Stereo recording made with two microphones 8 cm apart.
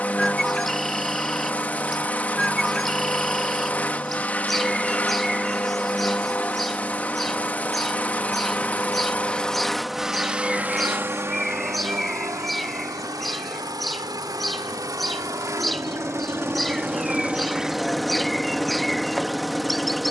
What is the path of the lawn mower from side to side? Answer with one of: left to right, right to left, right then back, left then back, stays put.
right then back.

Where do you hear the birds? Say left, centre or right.
centre.